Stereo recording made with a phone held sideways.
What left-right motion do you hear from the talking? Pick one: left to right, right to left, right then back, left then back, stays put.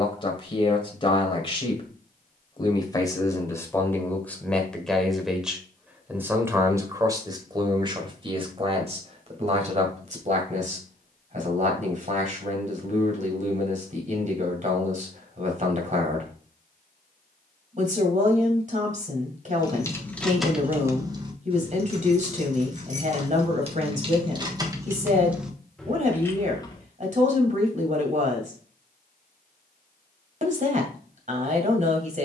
left to right.